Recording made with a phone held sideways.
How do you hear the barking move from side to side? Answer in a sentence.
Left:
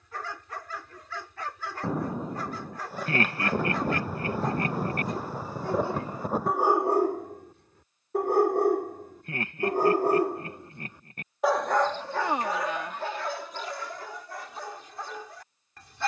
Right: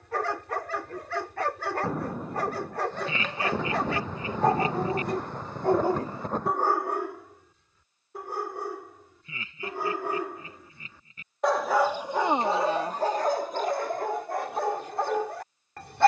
You can hear the barking move from right to left and back again.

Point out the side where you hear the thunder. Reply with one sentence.
You can hear the thunder in the centre.